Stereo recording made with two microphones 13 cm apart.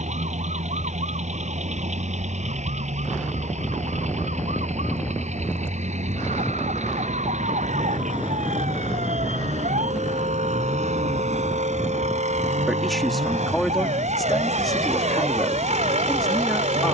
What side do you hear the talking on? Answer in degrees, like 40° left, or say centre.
centre.